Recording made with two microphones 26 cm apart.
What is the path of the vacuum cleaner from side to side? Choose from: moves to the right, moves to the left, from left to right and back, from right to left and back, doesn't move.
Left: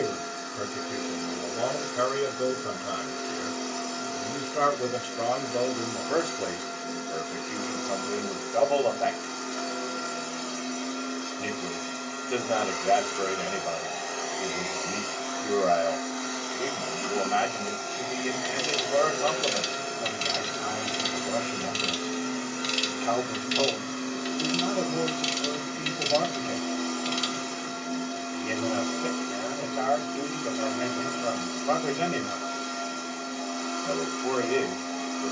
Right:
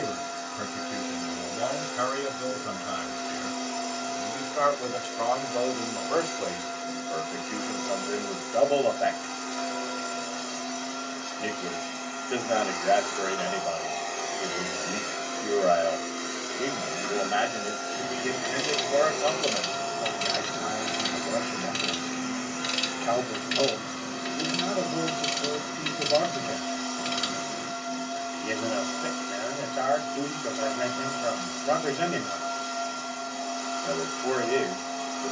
from left to right and back.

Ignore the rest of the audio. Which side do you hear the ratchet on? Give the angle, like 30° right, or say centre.
60° right.